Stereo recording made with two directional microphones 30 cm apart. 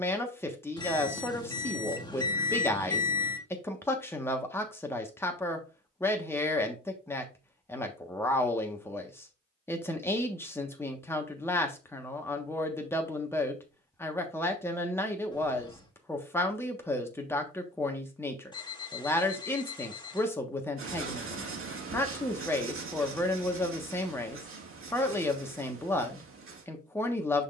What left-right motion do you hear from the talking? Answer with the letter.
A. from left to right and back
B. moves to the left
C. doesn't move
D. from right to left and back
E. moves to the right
C.